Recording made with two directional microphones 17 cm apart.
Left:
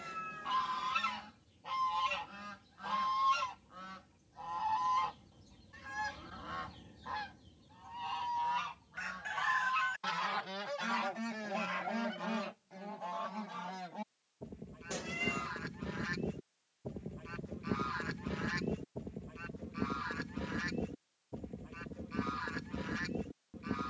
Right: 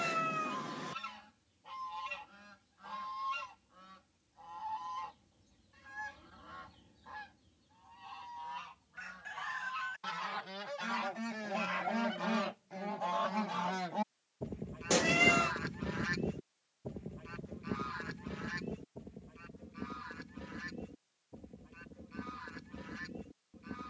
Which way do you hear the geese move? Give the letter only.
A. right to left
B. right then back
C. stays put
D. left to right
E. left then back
B.